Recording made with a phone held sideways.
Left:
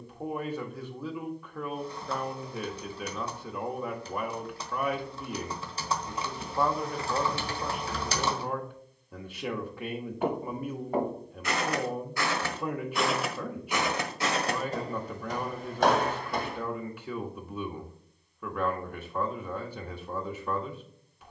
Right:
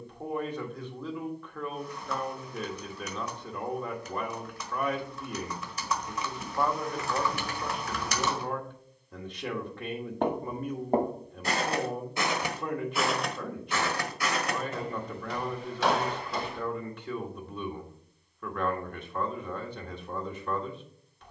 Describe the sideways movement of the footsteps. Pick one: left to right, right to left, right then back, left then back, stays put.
right to left.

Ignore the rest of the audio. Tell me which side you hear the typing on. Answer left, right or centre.
left.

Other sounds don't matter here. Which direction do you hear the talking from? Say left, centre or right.
centre.